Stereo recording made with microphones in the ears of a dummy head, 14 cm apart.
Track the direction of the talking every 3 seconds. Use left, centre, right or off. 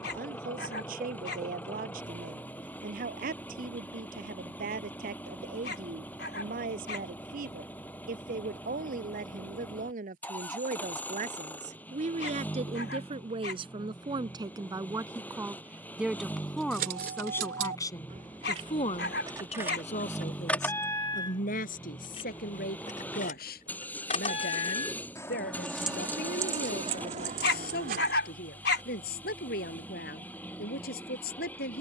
right, right, right, right, right, centre, left, left, left, left, left.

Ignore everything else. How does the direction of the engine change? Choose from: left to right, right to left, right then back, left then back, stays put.
stays put.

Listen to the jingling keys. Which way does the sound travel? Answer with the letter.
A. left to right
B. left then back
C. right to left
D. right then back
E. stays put
B.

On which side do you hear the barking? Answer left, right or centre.
left.